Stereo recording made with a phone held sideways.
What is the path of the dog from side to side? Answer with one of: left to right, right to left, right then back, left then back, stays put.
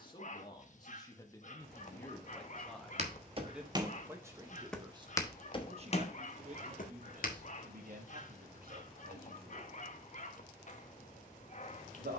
stays put.